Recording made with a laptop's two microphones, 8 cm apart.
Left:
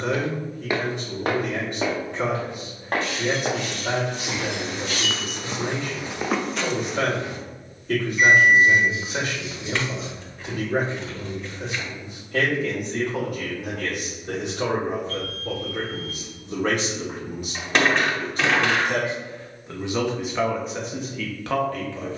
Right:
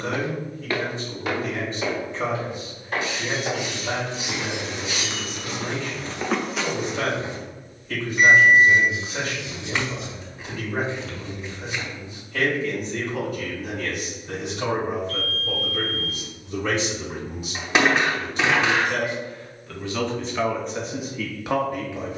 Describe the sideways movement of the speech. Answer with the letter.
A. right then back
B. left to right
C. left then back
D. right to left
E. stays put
B.